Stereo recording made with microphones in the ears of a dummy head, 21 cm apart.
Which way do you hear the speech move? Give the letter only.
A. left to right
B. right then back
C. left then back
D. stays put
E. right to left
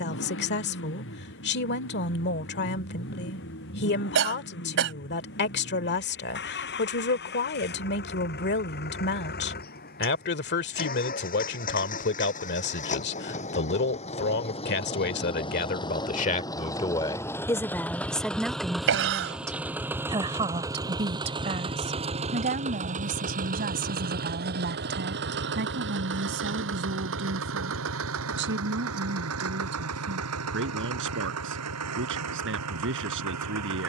A.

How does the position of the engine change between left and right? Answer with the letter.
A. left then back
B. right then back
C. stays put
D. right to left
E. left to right
E.